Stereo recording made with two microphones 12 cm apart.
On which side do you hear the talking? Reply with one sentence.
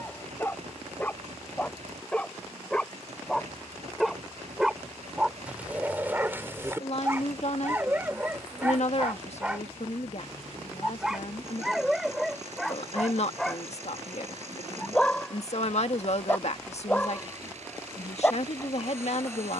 You can hear the talking on the left.